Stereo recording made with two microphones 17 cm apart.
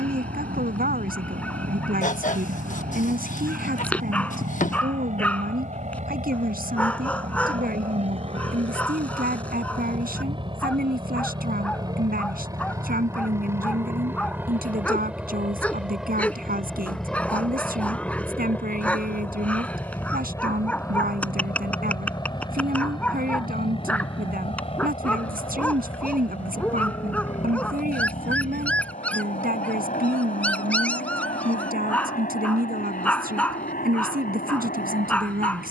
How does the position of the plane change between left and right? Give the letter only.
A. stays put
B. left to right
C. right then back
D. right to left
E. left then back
D.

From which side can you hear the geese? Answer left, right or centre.
left.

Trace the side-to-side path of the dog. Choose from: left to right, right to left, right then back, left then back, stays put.
stays put.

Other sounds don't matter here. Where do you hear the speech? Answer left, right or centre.
right.